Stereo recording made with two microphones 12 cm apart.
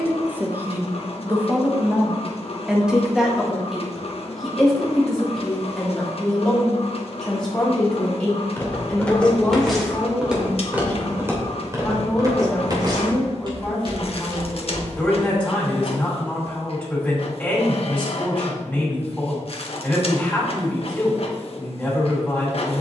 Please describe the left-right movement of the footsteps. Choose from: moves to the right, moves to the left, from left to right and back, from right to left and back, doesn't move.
moves to the right.